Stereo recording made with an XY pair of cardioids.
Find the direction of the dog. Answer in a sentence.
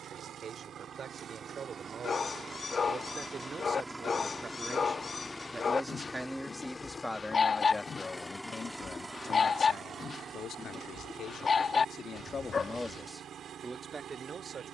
You can hear the dog on the left.